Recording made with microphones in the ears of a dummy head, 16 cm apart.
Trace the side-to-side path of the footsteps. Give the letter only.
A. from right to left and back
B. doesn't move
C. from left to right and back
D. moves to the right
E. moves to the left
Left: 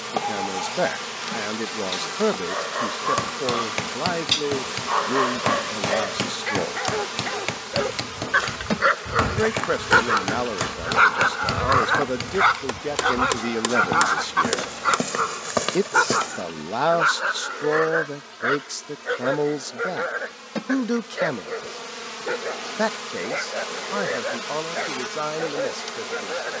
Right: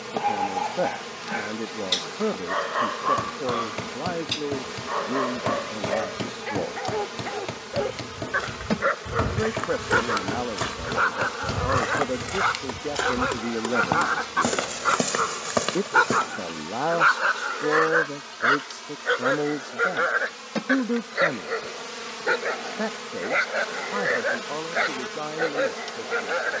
C.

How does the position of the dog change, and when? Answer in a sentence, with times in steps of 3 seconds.
In this clip you hear the dog on the right from 0 s, on the left from 3 s, in the centre from 15 s and on the right from 18 s.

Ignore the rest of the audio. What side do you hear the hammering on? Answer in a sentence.
You can hear the hammering on the left.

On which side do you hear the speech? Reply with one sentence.
In this clip you hear the speech on the left.